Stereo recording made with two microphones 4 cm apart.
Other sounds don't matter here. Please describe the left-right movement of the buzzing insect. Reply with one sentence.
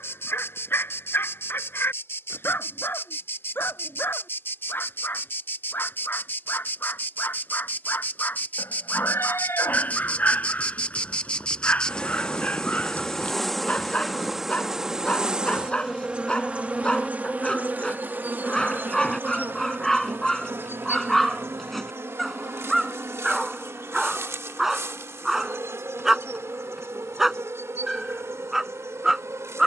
In this clip you hear the buzzing insect go from the left side to the right.